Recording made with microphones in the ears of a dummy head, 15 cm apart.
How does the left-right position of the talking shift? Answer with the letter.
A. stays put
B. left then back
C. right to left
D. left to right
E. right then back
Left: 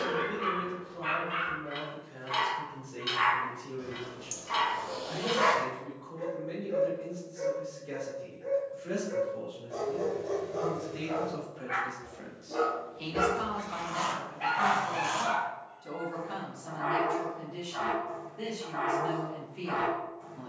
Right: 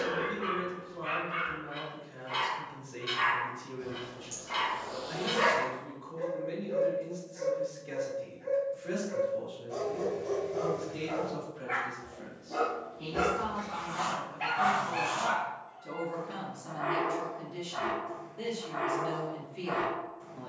B.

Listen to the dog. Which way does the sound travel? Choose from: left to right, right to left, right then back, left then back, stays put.
left to right.